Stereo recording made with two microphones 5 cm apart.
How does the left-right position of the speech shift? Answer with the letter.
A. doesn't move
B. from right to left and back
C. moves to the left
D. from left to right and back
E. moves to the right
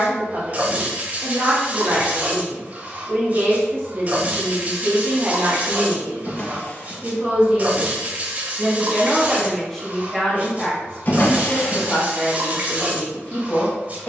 C.